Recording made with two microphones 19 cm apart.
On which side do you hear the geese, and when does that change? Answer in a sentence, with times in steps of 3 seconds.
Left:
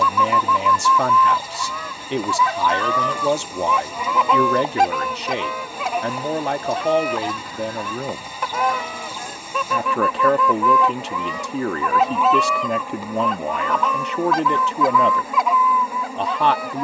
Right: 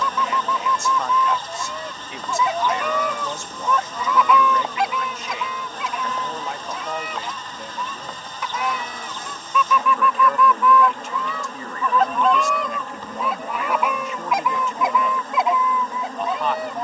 You can hear the geese on the right from 0 s, on the left from 3 s, in the centre from 12 s and on the right from 15 s.